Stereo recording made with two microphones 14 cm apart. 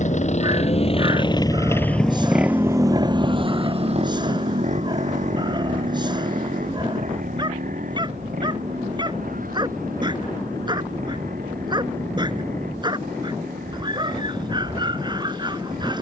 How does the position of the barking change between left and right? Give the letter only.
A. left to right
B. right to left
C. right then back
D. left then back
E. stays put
E.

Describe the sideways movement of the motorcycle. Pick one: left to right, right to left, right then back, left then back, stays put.
left to right.